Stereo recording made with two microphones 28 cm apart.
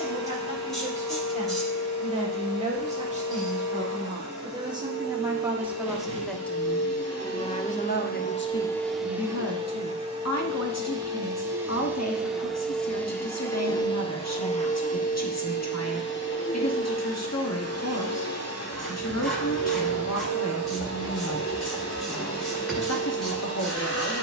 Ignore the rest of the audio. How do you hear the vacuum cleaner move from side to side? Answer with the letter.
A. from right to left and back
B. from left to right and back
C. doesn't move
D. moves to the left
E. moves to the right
B.